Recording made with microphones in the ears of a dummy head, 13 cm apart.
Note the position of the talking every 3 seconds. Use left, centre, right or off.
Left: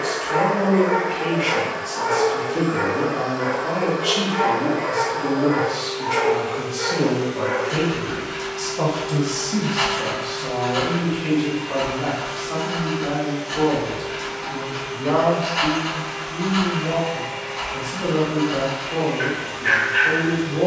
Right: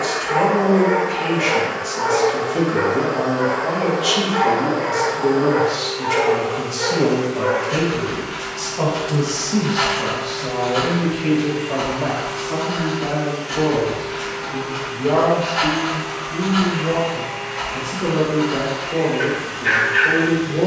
right, right, right, centre, left, left, left.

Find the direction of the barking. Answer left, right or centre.
centre.